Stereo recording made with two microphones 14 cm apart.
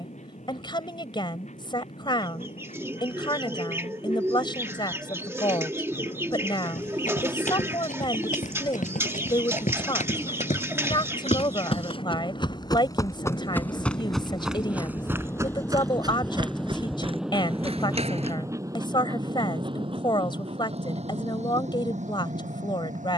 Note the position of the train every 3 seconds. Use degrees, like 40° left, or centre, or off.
60° left, 60° left, 50° left, 50° left, 30° left, centre, 30° right, 60° right.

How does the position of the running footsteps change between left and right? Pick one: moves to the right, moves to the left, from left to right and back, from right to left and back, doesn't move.
moves to the right.